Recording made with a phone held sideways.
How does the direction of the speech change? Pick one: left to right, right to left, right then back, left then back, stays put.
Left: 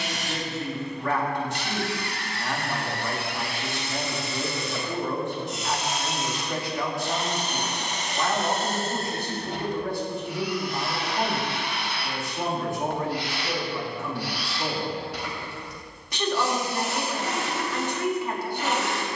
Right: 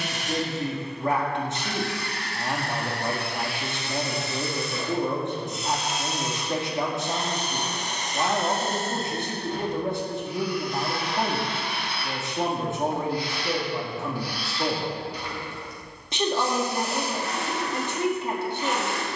stays put.